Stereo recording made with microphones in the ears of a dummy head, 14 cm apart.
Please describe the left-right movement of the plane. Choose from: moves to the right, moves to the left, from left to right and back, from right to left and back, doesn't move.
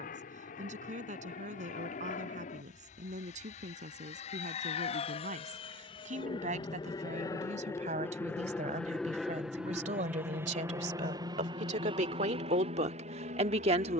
moves to the right.